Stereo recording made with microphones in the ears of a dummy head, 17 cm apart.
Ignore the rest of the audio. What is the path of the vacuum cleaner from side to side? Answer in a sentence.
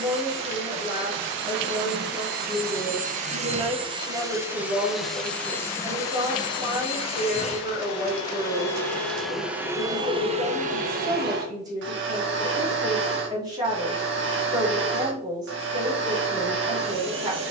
In this clip you hear the vacuum cleaner move from right to left and back again.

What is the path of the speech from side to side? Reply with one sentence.
In this clip you hear the speech stay in one place.